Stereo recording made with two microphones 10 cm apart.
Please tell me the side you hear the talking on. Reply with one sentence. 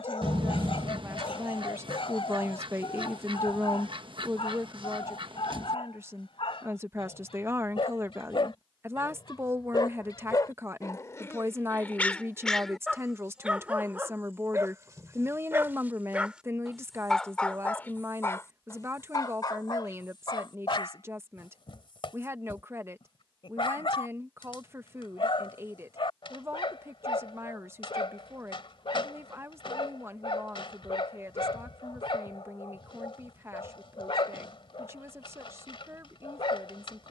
You can hear the talking on the right.